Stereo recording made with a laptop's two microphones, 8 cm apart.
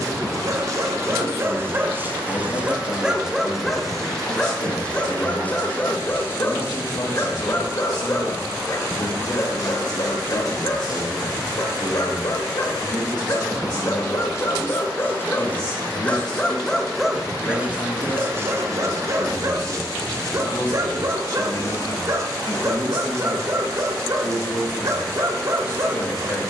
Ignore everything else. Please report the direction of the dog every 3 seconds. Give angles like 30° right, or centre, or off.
30° right, 10° left, 30° left, 40° left, 40° left, 10° left, 40° right, 40° right, 40° right.